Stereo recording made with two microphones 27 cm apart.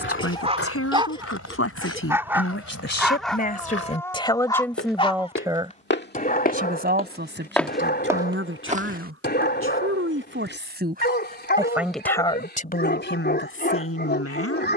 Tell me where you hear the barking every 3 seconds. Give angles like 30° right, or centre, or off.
10° right, 10° left, 40° left, 40° left, 40° left.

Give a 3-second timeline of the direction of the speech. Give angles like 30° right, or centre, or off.
60° left, 10° left, 50° right, 40° right, 50° left.